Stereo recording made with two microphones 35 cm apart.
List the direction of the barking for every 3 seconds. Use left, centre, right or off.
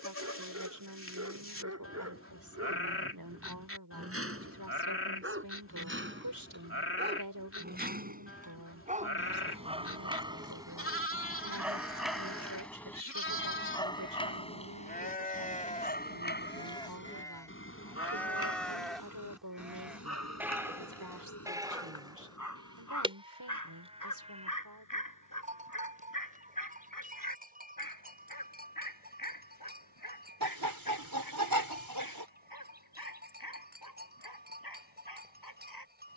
right, right, right, centre, centre, left, left, left, left, left, left, left.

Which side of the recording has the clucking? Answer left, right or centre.
right.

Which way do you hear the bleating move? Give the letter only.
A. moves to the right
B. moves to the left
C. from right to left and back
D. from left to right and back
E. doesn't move
A.